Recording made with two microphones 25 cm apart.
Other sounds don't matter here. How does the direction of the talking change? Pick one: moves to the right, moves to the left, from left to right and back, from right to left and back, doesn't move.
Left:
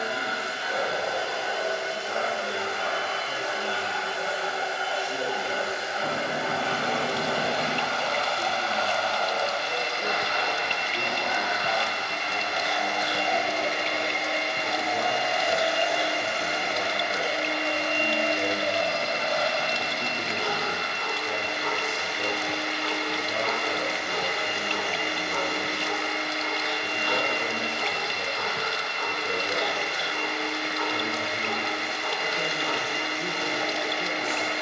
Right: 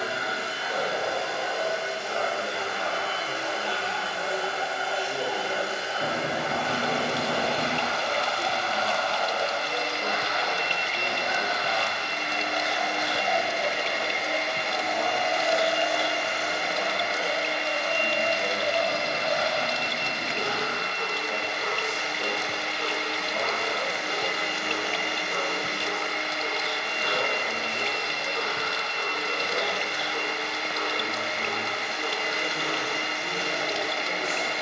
moves to the left.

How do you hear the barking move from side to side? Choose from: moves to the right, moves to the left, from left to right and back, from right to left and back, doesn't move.
moves to the right.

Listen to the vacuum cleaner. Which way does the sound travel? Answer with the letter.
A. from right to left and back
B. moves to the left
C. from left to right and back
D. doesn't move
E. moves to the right
B.